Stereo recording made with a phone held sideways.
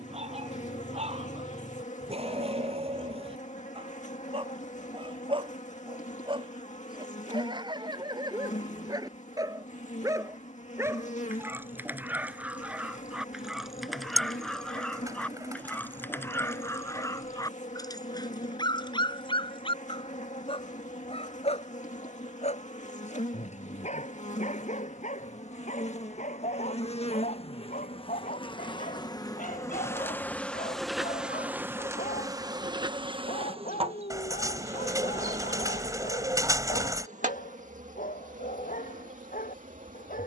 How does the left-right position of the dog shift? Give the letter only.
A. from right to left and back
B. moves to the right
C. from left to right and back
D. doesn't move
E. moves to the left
E.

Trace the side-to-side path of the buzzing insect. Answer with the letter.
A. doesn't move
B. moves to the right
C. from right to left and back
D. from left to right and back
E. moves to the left
B.